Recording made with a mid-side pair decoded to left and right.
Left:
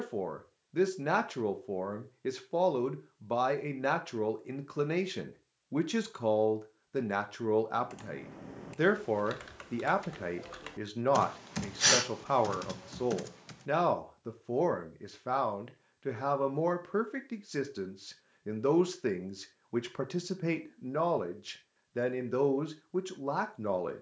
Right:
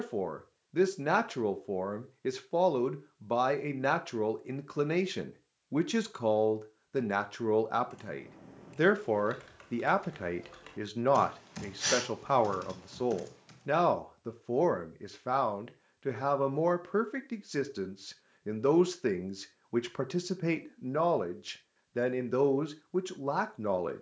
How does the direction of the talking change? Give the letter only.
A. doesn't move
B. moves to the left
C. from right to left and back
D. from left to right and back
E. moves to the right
A.